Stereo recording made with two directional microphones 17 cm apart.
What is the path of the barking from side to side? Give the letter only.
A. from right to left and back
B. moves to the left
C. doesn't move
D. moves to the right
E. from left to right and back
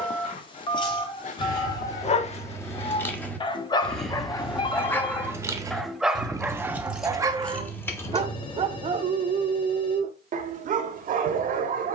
D.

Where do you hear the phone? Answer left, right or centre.
left.